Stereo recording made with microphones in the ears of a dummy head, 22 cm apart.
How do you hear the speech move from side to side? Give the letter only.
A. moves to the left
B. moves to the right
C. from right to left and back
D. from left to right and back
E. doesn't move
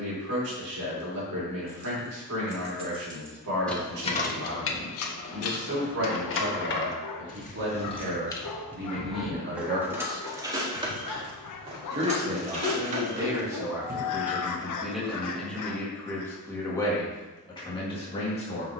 A.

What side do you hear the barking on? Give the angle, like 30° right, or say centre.
80° left.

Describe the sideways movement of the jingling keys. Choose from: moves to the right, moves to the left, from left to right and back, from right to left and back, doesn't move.
from right to left and back.